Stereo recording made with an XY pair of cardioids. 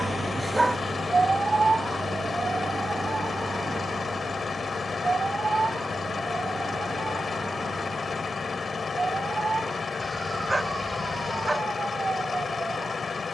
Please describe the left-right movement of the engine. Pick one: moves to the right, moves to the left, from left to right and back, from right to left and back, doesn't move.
doesn't move.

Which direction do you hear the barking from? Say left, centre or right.
centre.